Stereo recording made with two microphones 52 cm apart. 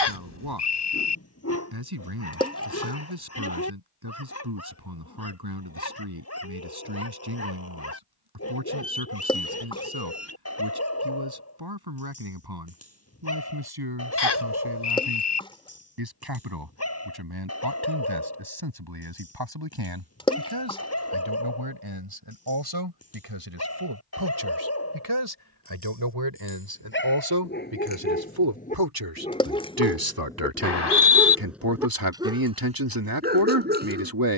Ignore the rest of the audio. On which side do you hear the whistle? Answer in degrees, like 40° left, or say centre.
50° left.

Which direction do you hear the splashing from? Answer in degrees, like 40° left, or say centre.
10° left.